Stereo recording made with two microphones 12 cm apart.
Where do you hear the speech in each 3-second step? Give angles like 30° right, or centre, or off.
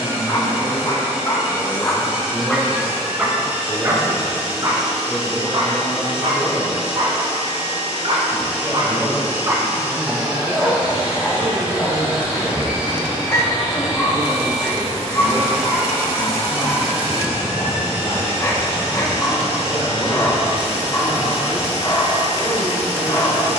30° right, 30° right, 30° right, 30° right, 10° right, 20° left, 40° left, 40° left.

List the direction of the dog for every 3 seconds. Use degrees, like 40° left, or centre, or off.
20° left, 30° right, 50° right, centre, 20° left, 20° left, 20° left, 20° left.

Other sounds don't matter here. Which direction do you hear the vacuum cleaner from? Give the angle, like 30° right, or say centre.
20° right.